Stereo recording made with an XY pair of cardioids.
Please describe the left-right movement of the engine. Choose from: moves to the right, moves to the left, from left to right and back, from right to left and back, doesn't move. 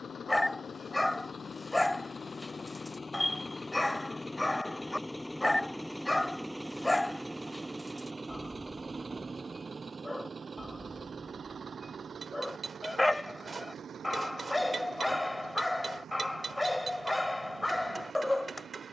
moves to the right.